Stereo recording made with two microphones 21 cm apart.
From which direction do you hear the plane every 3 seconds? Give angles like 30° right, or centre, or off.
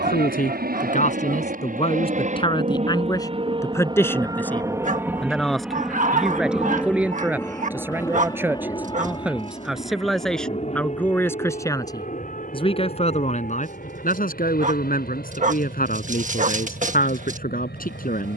50° right, 20° right, 10° left, 30° left, 40° left, 50° left.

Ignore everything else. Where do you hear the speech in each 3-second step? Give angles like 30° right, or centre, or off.
30° left, 10° left, 10° right, 10° left, 40° left, 50° left.